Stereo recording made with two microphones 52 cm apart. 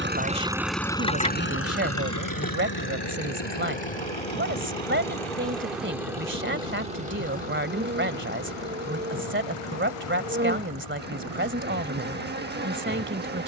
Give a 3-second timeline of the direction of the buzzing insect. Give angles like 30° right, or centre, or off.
10° left, 10° left, 20° right, 20° right, 20° right.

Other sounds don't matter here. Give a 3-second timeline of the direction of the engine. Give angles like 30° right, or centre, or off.
20° left, 60° left, 70° left, 80° left, off.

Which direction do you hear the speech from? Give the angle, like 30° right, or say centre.
20° right.